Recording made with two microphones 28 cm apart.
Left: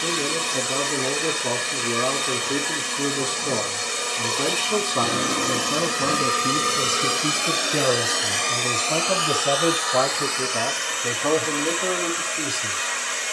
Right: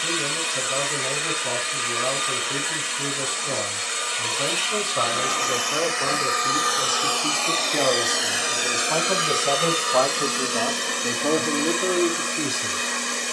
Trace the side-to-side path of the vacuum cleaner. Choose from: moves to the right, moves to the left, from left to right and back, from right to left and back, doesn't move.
moves to the right.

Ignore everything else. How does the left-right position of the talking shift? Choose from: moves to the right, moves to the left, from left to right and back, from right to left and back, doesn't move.
moves to the right.